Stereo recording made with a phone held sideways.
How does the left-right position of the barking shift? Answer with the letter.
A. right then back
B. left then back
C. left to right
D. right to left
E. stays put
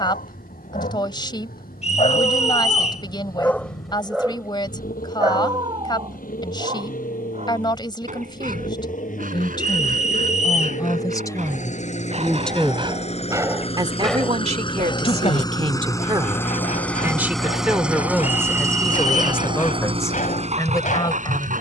A.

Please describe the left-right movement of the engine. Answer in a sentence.
In this clip you hear the engine move from left to right.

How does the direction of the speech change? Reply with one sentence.
In this clip you hear the speech go right and come back.